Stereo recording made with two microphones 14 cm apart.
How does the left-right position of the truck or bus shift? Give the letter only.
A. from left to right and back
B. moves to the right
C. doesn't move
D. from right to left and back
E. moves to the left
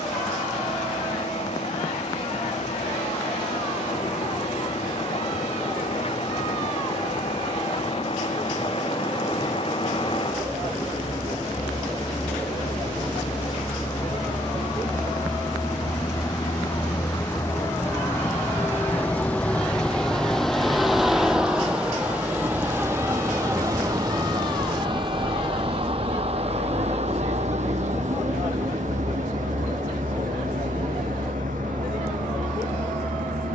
B.